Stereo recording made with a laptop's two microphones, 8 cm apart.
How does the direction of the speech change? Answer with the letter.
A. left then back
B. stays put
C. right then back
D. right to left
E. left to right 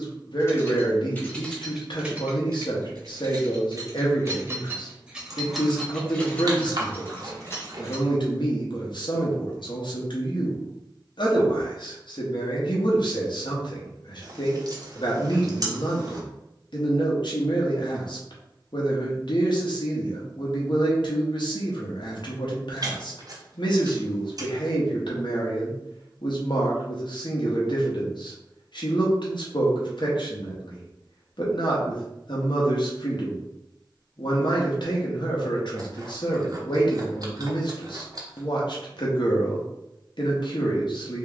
B.